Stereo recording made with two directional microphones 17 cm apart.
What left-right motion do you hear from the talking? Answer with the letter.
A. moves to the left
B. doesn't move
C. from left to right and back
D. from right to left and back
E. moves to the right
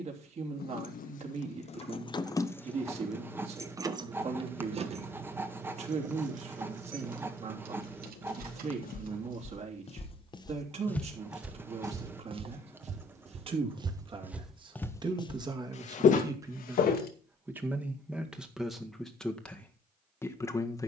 A.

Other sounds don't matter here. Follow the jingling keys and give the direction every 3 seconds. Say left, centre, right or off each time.
left, right, right, right, off, off, off.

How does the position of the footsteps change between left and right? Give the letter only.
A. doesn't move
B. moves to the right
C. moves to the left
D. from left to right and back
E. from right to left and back
D.